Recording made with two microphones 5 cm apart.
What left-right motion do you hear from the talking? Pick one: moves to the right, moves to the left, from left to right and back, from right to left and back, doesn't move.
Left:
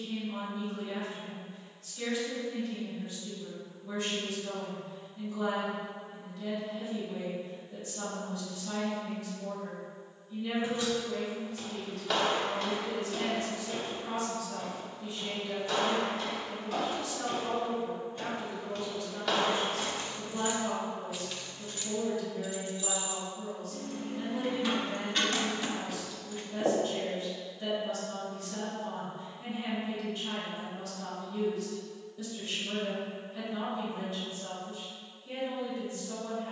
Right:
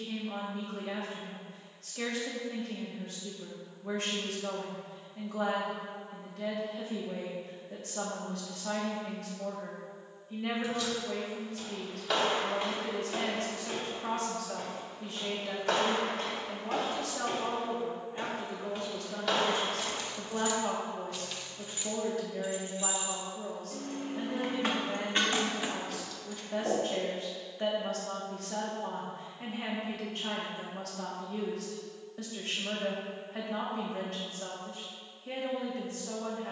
doesn't move.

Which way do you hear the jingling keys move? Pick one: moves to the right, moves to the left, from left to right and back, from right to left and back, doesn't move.
from left to right and back.